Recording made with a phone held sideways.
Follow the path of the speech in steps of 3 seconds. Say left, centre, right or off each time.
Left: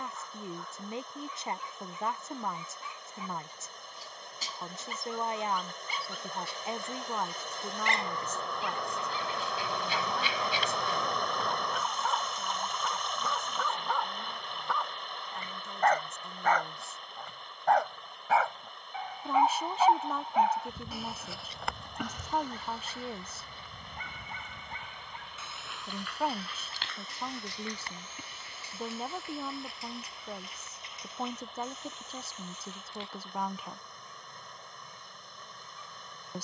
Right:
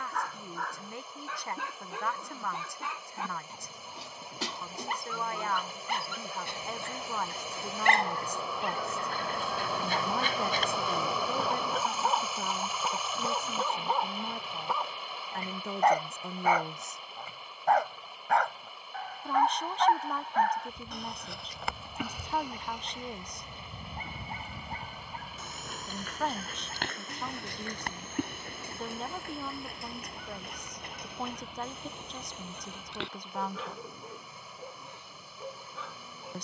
left, left, centre, right, right, right, centre, centre, centre, centre, centre, centre.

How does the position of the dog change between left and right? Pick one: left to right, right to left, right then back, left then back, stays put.
left then back.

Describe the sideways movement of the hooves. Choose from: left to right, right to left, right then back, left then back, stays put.
left to right.